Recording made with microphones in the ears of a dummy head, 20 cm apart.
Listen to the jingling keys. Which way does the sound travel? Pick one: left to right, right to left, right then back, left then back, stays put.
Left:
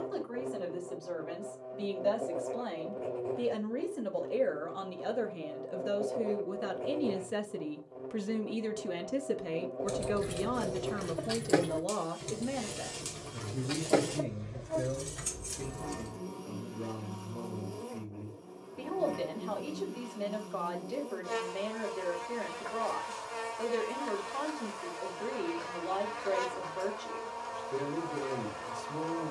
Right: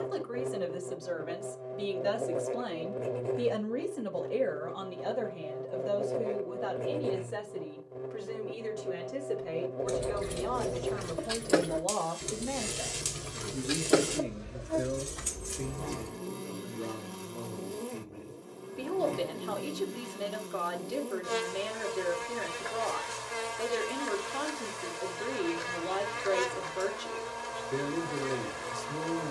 right then back.